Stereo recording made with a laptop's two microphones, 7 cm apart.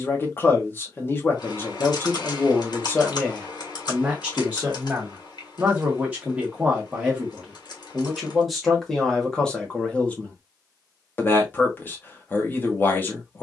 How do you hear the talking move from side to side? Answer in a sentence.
In this clip you hear the talking go right and come back.